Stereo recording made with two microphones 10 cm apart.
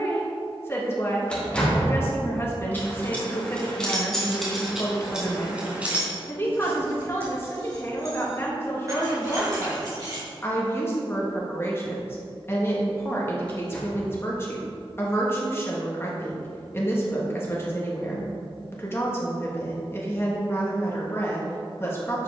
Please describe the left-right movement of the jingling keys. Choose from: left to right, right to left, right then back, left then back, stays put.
left to right.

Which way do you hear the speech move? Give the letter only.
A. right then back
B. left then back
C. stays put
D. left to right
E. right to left
C.